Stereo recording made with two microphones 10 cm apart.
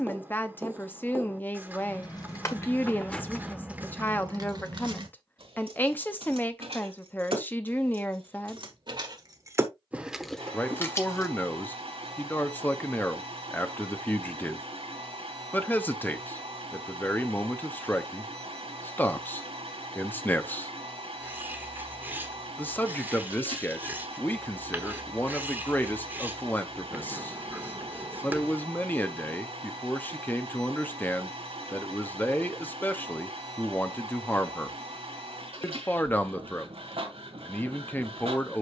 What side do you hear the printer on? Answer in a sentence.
You can hear the printer on the right.